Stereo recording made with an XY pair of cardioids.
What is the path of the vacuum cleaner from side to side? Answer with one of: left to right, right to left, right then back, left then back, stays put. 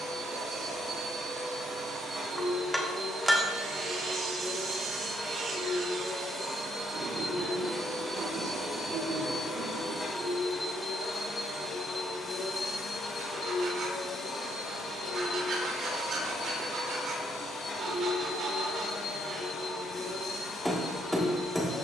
right to left.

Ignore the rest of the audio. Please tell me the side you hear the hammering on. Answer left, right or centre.
centre.